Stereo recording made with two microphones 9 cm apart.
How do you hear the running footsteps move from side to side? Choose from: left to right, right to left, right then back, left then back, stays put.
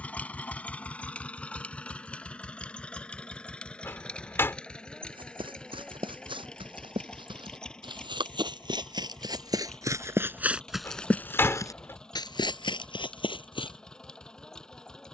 right to left.